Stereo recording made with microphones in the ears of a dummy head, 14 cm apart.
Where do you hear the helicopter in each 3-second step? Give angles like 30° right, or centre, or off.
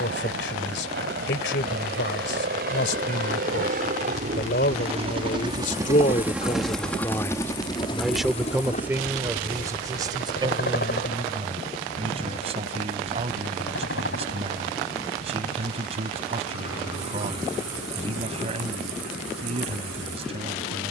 70° right, 40° right, 20° left, 60° left, 70° left, 70° left, 80° left.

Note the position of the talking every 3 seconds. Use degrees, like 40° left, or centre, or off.
80° left, 70° left, 10° left, 30° right, 40° right, 40° right, 40° right.